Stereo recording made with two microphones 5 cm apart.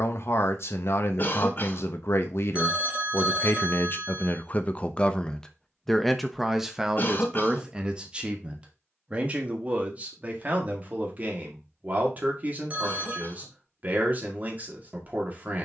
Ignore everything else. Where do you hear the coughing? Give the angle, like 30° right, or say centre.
40° left.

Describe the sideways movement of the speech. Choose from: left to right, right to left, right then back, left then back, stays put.
left to right.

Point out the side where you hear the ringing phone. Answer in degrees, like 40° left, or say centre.
30° right.